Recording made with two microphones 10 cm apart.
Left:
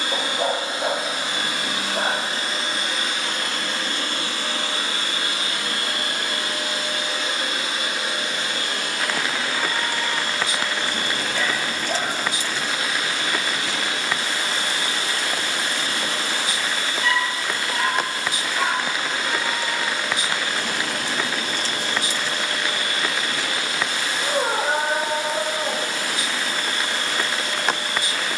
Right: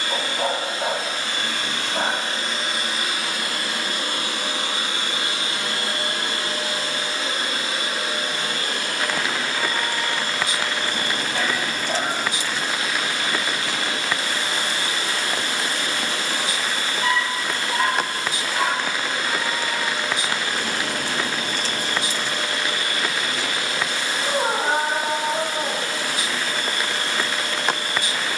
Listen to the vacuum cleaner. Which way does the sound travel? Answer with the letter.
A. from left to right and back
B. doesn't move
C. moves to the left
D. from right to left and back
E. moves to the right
E.